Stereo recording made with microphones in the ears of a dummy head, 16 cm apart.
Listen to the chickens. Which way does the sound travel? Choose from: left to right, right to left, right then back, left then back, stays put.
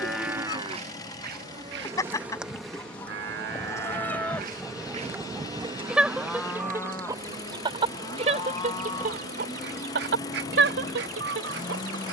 left to right.